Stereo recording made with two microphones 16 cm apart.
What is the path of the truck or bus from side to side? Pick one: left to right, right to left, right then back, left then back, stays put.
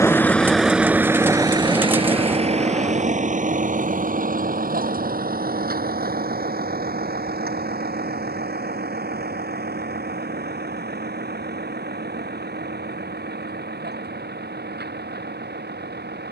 left to right.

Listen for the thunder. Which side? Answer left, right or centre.
centre.